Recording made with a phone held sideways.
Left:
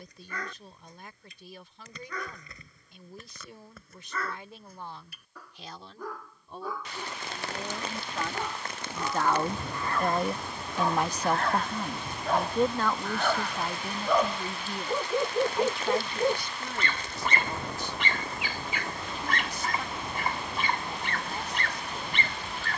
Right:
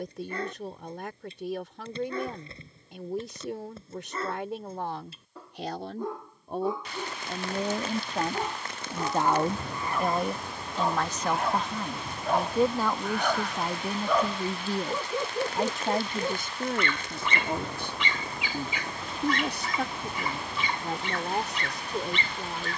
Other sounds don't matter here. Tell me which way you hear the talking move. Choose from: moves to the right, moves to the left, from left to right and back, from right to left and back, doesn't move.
from right to left and back.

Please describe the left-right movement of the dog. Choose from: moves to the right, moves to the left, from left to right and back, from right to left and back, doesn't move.
moves to the left.